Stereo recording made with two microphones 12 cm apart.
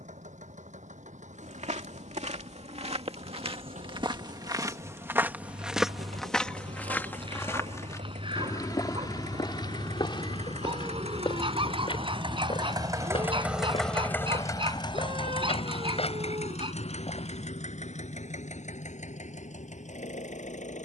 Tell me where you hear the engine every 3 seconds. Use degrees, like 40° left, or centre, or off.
80° right, 80° right, 80° right, 60° right, 10° right, 60° left, 80° left.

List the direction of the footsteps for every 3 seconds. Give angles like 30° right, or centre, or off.
70° right, 30° right, 20° left, 40° left, 50° left, 50° left, off.